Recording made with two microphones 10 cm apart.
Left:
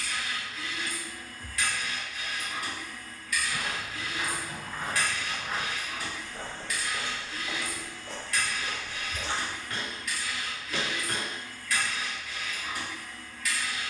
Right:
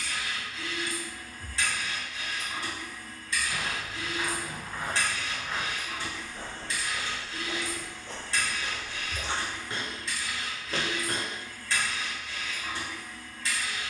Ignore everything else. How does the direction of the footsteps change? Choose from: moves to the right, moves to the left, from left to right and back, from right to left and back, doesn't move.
from right to left and back.